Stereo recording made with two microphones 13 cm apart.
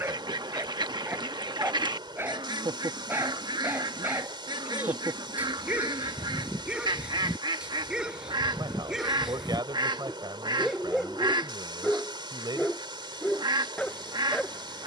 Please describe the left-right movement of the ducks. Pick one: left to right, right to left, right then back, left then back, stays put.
stays put.